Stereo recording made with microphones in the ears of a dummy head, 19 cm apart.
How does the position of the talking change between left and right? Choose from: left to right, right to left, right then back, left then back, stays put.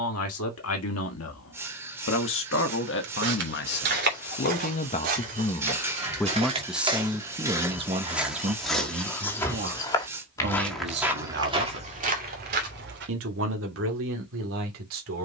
left to right.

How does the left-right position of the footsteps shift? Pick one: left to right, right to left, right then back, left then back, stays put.
left then back.